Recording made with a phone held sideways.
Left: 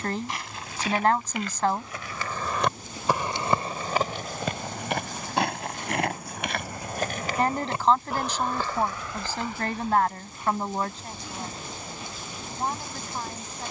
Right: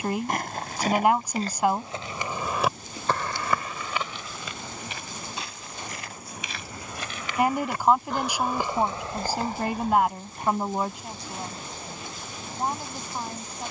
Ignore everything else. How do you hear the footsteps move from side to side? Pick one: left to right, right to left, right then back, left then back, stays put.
left then back.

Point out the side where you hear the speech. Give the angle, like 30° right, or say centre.
10° right.